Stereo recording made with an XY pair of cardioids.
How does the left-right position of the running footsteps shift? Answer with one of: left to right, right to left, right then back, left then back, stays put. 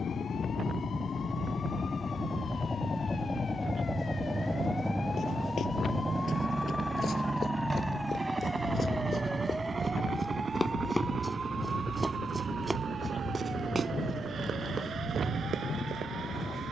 left to right.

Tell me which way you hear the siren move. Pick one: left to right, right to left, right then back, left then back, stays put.
left to right.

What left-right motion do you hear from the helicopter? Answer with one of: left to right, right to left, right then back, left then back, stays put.
left to right.